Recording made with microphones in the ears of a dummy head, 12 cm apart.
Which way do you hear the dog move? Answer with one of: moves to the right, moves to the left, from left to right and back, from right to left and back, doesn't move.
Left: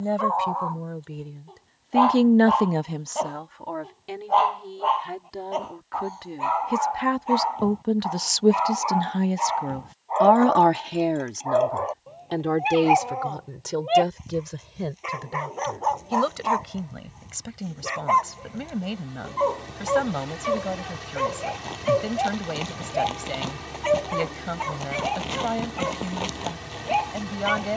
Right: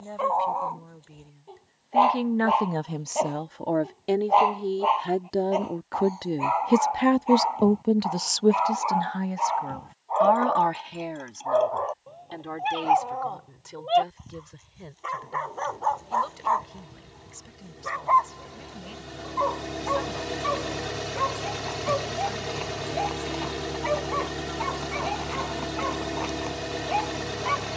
moves to the left.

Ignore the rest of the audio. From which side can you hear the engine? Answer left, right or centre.
right.